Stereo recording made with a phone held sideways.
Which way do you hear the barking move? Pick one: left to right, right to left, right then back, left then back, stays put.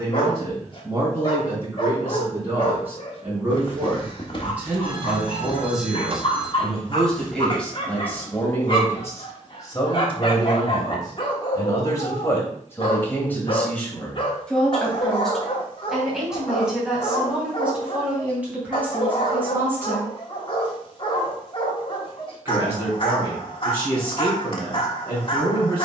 stays put.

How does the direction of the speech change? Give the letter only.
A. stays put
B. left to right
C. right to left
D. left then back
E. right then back
D.